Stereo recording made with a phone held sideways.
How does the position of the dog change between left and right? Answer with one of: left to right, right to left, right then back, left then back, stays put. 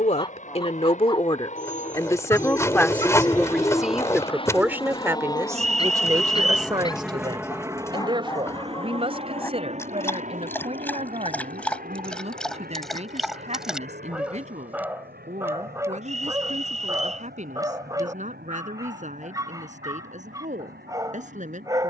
left to right.